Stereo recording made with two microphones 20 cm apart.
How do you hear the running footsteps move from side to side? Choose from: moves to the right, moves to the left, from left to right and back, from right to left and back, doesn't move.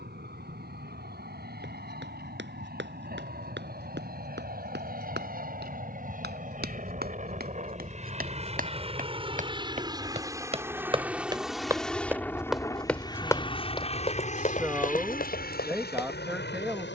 moves to the left.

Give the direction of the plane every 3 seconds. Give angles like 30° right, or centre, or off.
60° right, 50° right, 40° right, 10° right, 20° left, 50° left.